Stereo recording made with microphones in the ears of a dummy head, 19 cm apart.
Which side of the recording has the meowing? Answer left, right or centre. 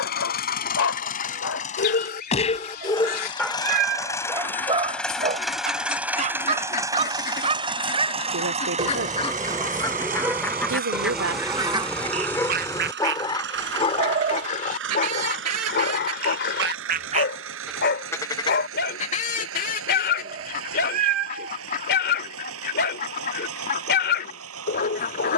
right.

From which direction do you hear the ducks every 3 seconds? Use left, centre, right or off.
left, left, left, centre, right, right, left, left, left.